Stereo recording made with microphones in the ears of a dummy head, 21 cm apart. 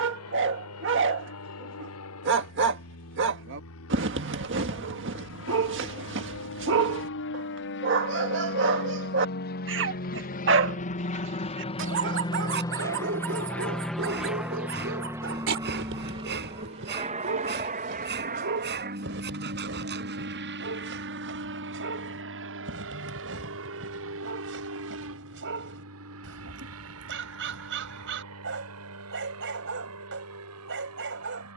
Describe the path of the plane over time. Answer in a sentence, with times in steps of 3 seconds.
You can hear the plane on the left from 0 s, in the centre from 12 s and on the right from 15 s.